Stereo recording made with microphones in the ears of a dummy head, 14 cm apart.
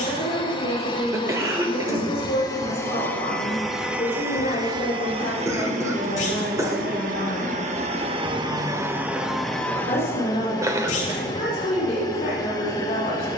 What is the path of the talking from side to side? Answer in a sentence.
You can hear the talking stay put.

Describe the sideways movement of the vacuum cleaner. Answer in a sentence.
You can hear the vacuum cleaner move from left to right and back again.